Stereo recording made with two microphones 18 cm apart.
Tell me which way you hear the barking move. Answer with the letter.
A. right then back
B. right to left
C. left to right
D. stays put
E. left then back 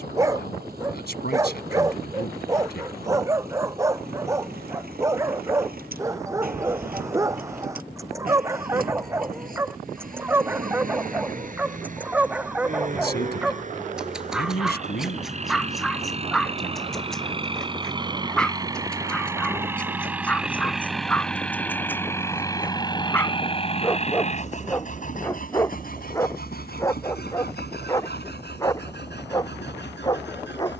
B.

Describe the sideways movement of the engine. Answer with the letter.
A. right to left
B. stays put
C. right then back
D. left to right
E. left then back
A.